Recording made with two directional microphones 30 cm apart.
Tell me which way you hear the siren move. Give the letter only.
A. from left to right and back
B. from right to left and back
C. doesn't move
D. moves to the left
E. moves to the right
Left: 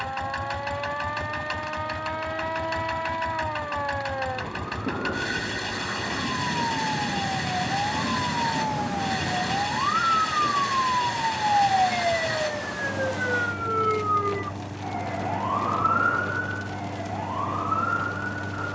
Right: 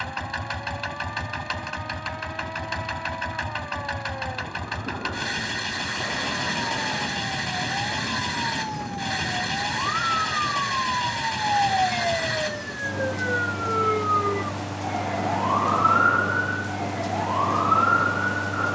E.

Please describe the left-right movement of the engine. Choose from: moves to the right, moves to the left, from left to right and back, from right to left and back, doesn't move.
doesn't move.